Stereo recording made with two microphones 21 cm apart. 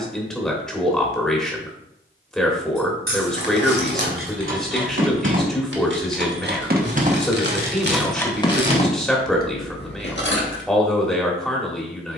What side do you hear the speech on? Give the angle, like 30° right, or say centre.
centre.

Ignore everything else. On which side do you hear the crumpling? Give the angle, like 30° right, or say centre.
50° right.